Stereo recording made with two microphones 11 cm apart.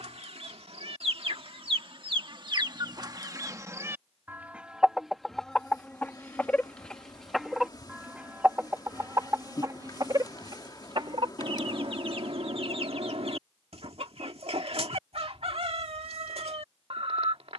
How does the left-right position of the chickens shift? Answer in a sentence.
In this clip you hear the chickens move from right to left and back again.